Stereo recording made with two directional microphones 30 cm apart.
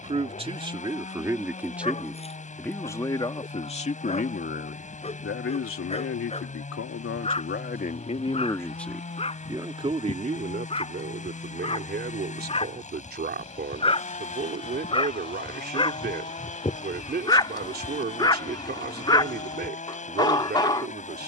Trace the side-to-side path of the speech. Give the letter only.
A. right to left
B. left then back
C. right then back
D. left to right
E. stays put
B.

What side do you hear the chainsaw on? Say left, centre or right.
left.